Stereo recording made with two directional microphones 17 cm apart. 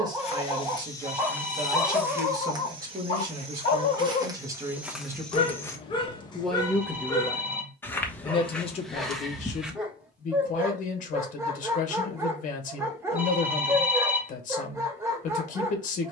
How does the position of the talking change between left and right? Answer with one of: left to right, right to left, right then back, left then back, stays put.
right to left.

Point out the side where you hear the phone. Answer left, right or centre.
centre.